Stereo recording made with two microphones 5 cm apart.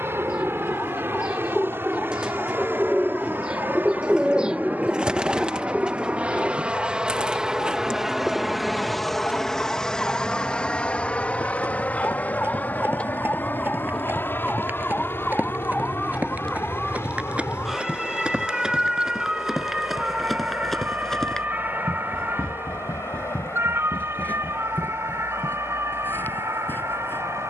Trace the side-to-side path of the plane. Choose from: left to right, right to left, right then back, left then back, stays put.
right to left.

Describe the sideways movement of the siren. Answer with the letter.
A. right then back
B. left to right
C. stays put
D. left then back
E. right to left
B.